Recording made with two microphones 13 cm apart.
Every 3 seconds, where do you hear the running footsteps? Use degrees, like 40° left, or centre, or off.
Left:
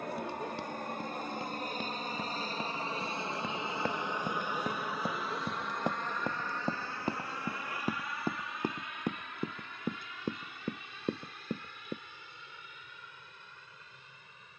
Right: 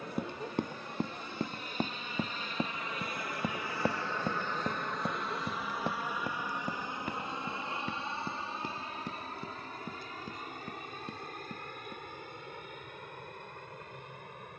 40° right, centre, 40° left, 60° left, off.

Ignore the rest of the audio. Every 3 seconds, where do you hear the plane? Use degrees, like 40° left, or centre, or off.
50° left, 10° left, 20° right, 40° right, 50° right.